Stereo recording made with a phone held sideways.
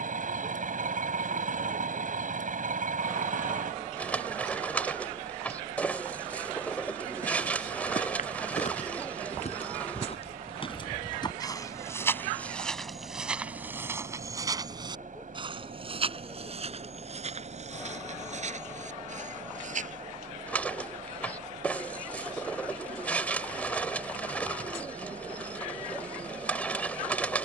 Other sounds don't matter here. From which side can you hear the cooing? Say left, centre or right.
centre.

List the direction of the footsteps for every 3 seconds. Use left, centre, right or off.
off, off, left, left, centre, right, right, off, off.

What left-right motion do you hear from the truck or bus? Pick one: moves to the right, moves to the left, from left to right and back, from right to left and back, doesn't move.
doesn't move.